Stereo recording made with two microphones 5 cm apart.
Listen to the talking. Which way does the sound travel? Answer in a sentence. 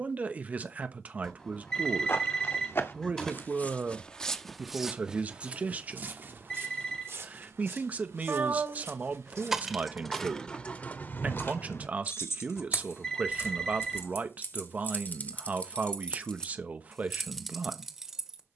In this clip you hear the talking stay put.